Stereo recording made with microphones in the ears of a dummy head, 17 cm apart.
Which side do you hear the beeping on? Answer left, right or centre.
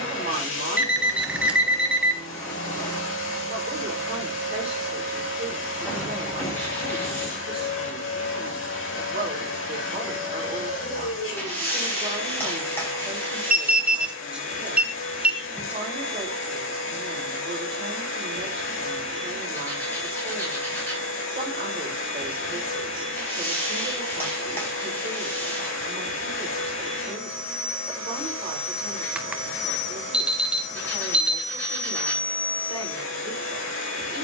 centre.